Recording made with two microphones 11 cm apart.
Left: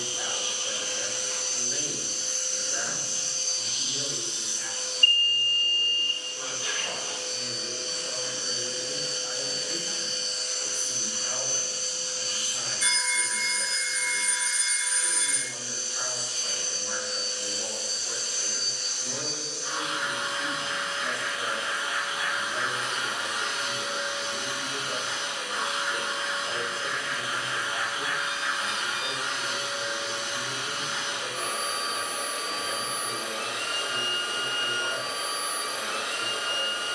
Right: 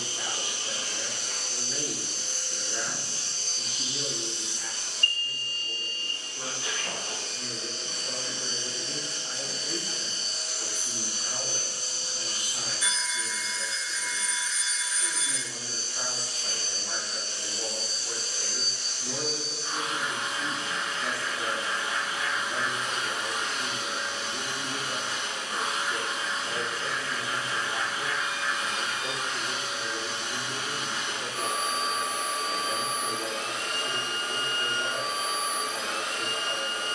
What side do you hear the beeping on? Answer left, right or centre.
left.